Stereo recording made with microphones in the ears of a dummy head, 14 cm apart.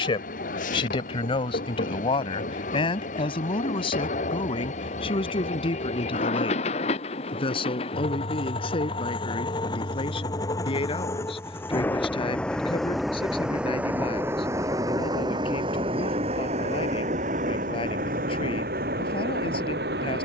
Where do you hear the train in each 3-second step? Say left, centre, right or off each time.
left, left, left, left, centre, right, right.